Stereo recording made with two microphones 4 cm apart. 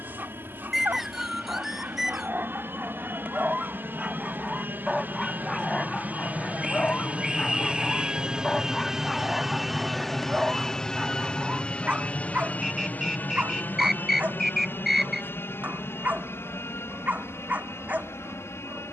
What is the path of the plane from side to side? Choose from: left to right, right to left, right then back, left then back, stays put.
right to left.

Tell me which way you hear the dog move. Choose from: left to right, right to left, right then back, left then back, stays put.
left then back.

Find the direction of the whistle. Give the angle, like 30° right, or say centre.
10° right.